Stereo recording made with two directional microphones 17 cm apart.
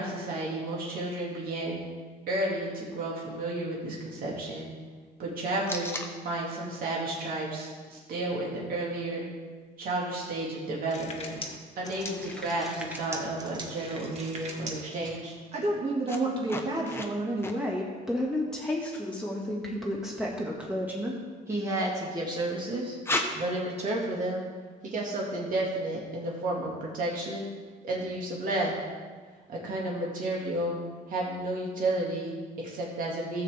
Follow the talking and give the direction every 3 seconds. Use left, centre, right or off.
right, right, right, right, right, right, centre, right, right, right, right.